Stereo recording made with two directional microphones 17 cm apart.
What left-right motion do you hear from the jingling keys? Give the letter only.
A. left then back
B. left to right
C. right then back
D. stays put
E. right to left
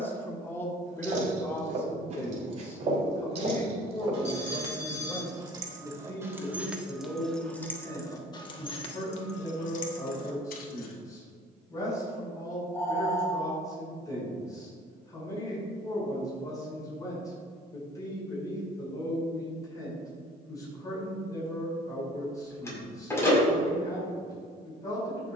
E.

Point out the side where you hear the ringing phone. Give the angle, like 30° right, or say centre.
20° left.